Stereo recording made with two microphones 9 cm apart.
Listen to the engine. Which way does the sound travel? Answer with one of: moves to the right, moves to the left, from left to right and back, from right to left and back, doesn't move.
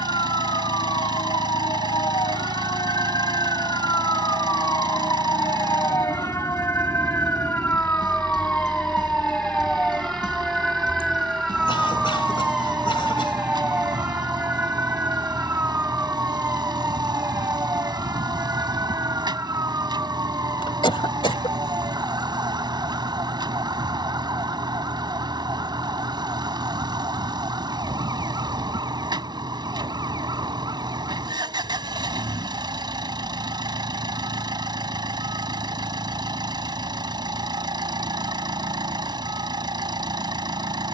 doesn't move.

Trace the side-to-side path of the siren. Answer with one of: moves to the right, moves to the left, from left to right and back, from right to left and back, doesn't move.
moves to the right.